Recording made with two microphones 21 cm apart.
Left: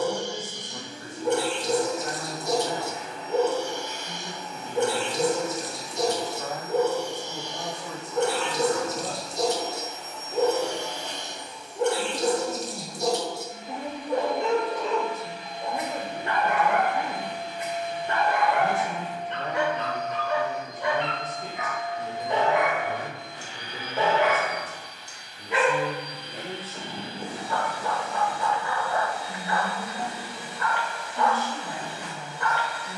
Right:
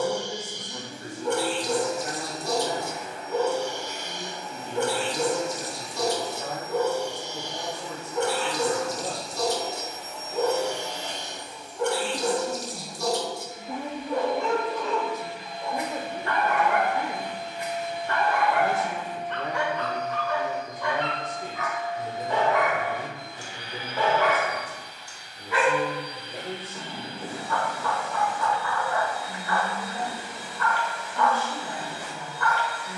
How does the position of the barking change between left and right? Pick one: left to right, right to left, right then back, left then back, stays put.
stays put.